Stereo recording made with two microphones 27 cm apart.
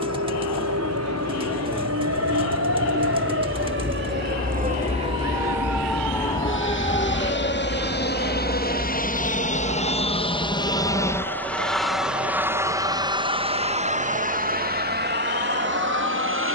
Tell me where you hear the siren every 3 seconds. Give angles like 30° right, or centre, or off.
70° right, 30° right, 30° left, 60° left, 70° left, 70° left.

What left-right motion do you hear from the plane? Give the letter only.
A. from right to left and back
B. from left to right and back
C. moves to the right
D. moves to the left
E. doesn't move
C.